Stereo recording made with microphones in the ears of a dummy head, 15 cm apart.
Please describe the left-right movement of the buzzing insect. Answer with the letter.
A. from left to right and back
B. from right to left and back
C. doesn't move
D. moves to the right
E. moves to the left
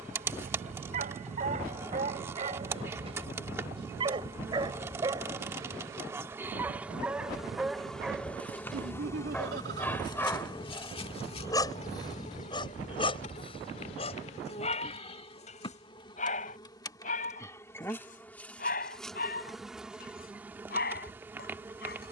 B.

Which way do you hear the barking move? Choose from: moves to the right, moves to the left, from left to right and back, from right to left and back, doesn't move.
moves to the left.